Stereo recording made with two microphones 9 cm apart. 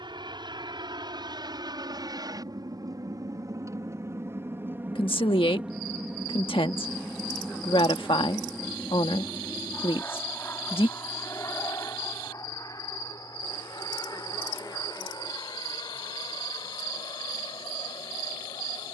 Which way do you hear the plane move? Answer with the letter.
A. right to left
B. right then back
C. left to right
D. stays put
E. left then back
A.